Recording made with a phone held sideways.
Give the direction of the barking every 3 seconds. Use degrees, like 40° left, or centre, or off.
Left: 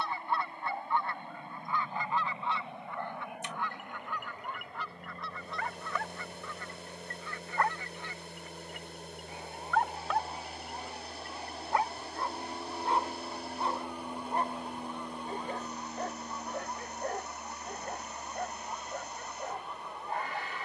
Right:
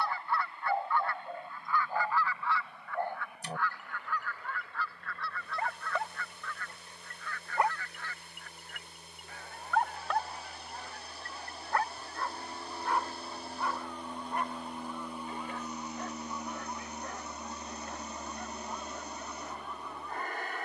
50° right, 40° right, 20° right, 10° left, 30° left, 50° left, 60° left.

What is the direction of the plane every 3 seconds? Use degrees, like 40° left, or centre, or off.
60° left, 50° left, 40° left, 30° left, 10° left, 20° right, 40° right.